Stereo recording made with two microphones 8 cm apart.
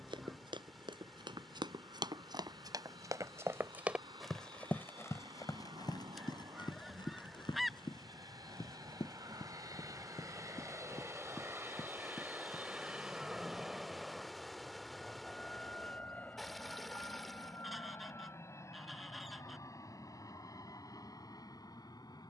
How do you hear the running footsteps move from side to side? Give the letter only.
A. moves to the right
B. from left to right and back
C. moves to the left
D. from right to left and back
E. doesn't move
C.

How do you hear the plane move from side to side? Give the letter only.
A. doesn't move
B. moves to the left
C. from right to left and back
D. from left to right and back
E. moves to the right
B.